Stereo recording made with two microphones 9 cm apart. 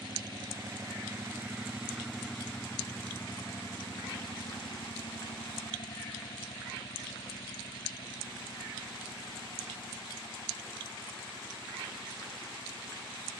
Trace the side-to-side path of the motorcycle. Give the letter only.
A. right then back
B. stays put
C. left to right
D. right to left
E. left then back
D.